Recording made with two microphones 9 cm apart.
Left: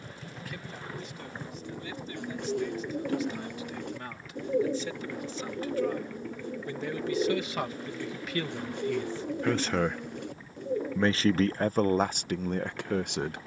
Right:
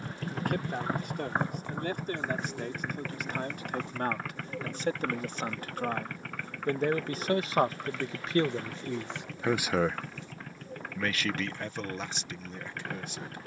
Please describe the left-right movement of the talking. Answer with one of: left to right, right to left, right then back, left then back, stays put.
right to left.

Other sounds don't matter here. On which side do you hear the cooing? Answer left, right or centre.
left.